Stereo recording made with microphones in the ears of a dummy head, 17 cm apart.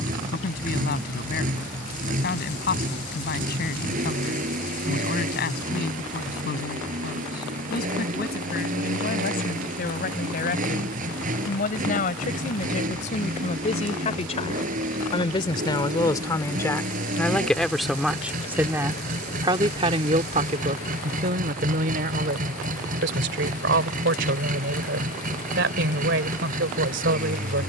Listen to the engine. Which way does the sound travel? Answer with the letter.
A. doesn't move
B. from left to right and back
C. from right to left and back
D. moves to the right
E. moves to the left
A.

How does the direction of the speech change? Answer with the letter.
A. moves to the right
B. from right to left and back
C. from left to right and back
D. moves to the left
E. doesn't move
A.